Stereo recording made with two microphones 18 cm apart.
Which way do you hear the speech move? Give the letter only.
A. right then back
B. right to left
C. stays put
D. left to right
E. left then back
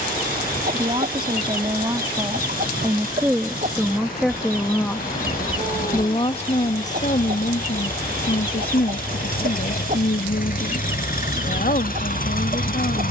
B.